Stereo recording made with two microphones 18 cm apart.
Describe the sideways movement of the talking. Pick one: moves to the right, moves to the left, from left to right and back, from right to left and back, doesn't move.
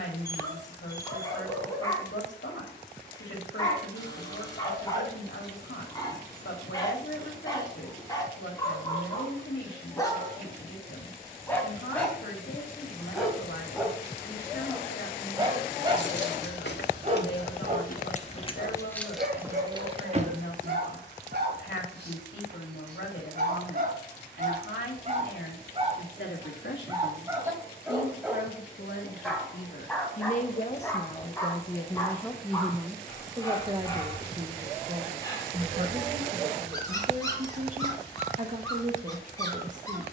moves to the right.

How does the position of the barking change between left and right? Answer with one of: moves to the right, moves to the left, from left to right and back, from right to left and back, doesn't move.
from left to right and back.